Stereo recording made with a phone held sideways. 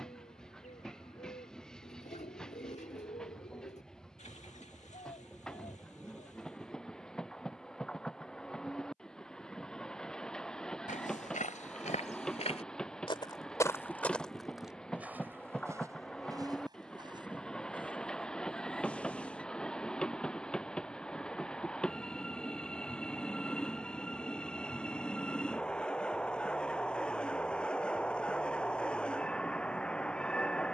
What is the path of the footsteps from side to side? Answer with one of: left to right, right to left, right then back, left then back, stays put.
left to right.